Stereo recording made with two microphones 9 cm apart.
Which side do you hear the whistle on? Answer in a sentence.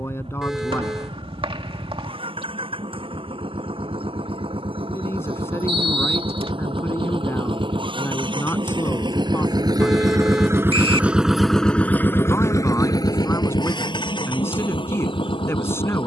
In this clip you hear the whistle on the right.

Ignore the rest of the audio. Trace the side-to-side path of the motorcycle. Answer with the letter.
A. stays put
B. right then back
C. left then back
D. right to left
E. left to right
D.